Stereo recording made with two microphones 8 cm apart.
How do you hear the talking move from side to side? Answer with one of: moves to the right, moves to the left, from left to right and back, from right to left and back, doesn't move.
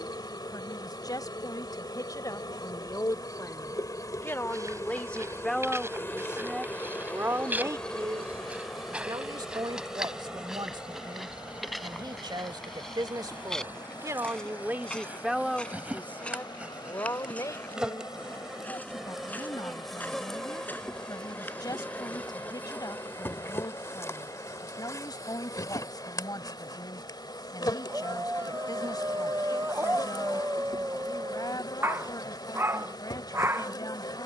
from left to right and back.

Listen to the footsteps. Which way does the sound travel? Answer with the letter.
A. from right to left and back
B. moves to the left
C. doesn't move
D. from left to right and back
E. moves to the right
B.